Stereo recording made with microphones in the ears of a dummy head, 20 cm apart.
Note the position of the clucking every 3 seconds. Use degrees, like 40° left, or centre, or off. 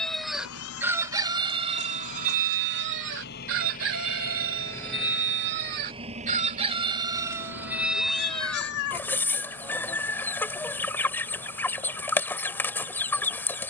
30° right, 60° right, 10° right, 10° left, 10° left.